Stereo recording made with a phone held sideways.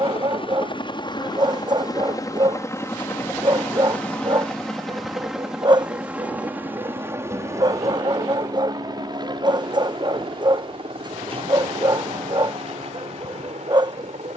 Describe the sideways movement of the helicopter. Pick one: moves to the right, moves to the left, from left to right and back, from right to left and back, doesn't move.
moves to the right.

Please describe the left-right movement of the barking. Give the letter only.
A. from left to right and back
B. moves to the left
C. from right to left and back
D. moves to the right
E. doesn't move
E.